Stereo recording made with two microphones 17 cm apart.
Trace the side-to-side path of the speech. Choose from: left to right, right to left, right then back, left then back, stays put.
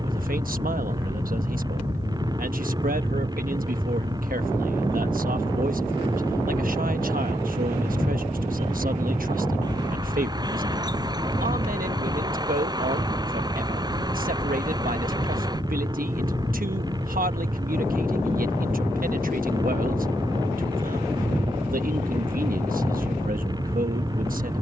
stays put.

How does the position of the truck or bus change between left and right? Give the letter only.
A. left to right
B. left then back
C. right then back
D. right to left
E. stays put
E.